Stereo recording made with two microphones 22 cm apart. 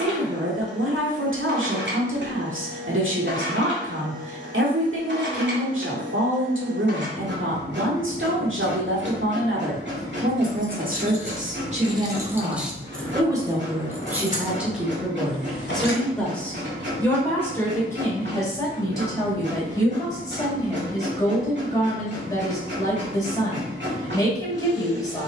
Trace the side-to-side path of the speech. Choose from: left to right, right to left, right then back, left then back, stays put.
right to left.